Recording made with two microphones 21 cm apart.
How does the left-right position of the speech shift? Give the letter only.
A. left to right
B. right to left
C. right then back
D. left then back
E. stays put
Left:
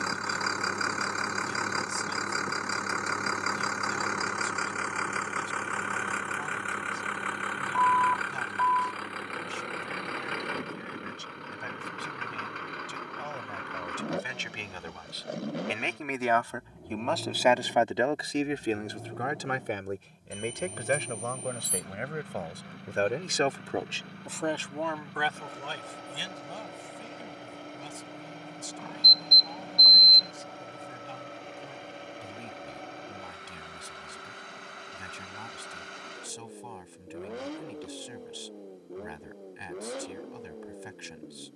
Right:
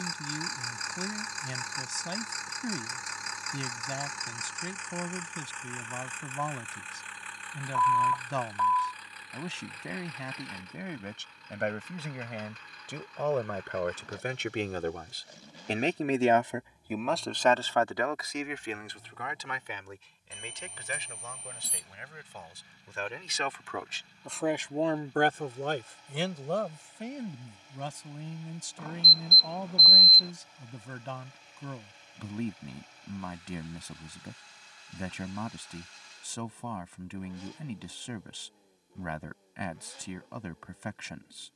D.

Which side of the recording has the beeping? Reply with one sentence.
You can hear the beeping in the centre.